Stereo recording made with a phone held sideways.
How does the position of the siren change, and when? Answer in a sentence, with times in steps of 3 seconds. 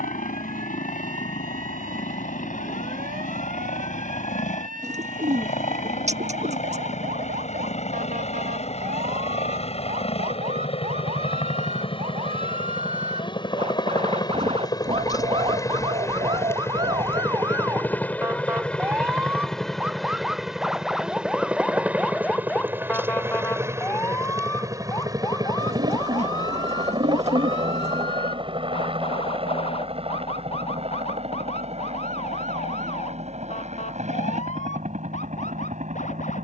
In this clip you hear the siren on the right from 0 s, in the centre from 18 s and on the left from 24 s.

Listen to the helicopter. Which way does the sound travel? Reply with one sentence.
You can hear the helicopter travel towards the right.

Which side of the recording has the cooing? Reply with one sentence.
You can hear the cooing on the right.